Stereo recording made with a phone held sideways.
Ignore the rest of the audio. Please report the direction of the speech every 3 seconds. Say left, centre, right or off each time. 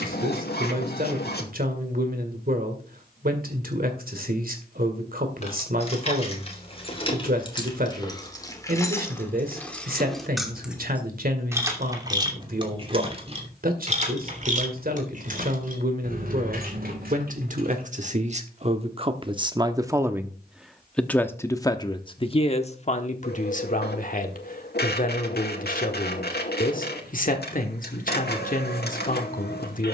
right, right, right, right, right, right, right, left, left, left.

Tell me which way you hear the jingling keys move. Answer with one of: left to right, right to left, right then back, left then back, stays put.
left to right.